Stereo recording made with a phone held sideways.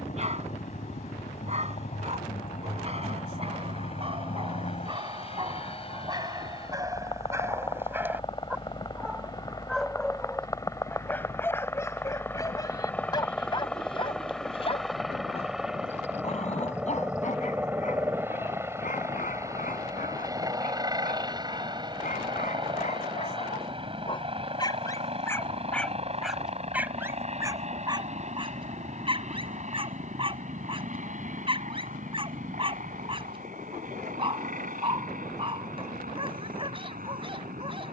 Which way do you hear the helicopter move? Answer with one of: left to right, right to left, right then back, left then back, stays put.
left to right.